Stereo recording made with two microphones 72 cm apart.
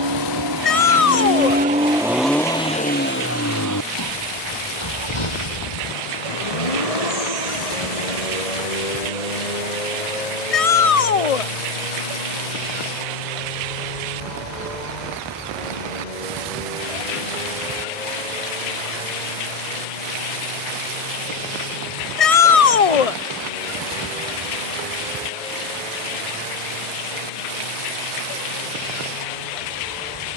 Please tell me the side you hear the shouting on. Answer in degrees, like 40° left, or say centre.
50° left.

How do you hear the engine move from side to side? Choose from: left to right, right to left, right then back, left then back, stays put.
right to left.